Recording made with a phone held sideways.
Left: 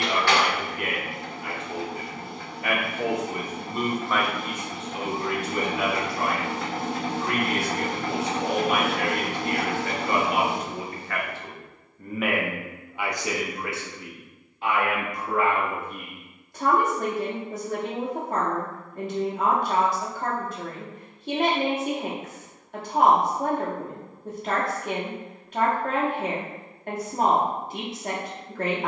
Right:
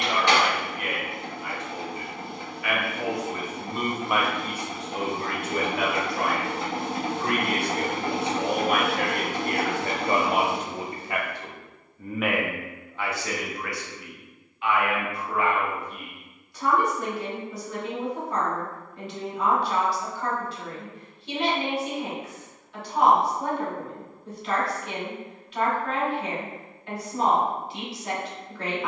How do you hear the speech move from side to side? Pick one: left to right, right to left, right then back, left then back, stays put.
right then back.